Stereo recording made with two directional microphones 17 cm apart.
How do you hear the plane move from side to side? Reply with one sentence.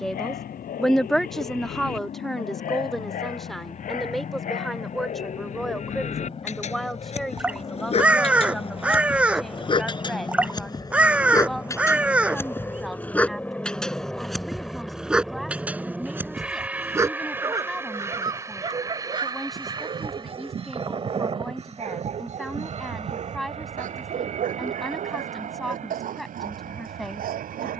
You can hear the plane move from left to right.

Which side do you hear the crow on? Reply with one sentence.
You can hear the crow in the centre.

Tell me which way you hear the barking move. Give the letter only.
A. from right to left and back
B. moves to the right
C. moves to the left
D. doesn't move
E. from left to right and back
B.